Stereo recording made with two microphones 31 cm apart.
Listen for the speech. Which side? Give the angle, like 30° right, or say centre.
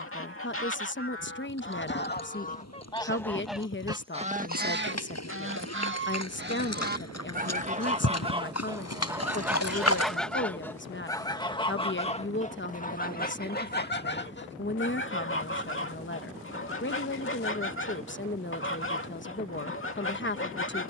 40° left.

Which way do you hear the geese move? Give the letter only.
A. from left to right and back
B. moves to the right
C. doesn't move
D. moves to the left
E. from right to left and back
A.